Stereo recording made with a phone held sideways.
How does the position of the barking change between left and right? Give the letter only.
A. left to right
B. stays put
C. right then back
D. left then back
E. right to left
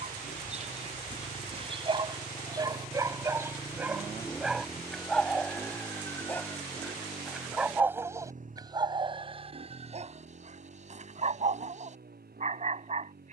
D.